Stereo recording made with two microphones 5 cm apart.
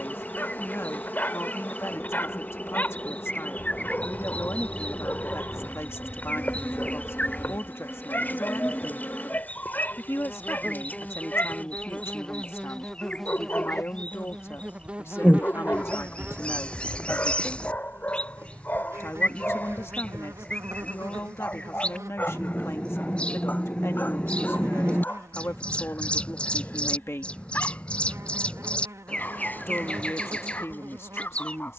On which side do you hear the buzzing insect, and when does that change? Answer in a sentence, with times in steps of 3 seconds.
In this clip you hear the buzzing insect on the left from 0 s, in the centre from 12 s and on the right from 15 s.